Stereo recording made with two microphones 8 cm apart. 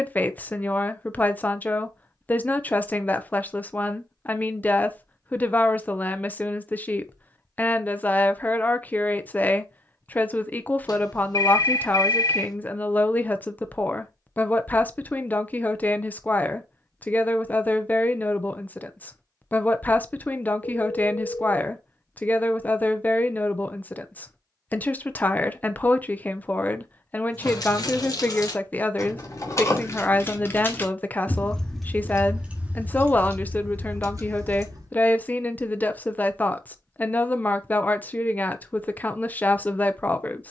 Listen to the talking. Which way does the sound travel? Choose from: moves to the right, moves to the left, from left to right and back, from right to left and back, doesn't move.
doesn't move.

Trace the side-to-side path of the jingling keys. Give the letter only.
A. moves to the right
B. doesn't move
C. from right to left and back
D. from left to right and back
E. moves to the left
A.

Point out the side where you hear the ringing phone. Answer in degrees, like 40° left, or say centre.
60° left.